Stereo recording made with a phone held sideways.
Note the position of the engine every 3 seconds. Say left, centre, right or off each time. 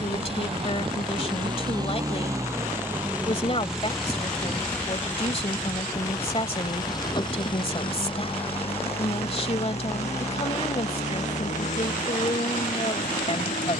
right, centre, left, left, left.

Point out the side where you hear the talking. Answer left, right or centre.
left.